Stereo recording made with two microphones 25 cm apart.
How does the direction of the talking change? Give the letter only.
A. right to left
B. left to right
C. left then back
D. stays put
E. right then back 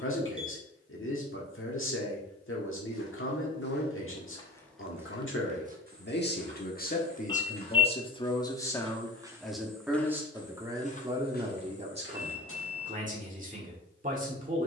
B.